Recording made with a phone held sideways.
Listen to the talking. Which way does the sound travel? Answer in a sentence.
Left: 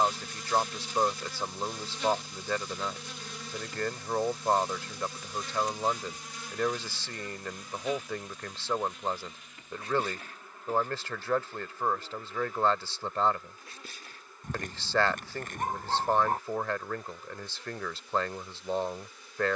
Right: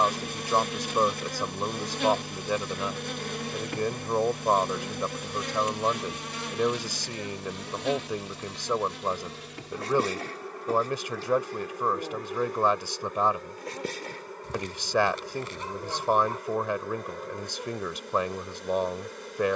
You can hear the talking stay in one place.